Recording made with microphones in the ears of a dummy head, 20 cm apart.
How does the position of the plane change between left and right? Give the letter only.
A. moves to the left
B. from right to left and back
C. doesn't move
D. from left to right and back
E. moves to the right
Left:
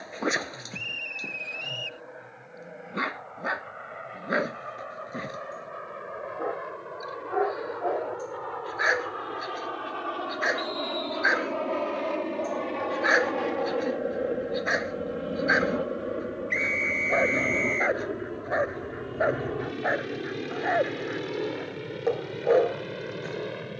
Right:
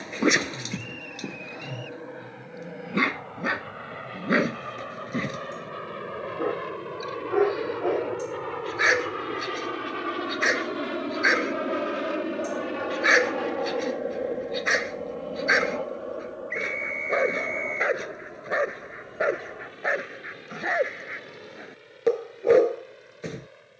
A.